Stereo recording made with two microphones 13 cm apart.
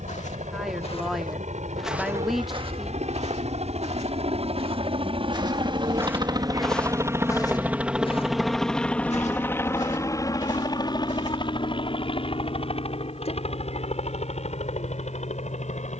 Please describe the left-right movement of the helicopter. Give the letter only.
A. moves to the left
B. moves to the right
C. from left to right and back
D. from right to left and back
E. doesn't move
A.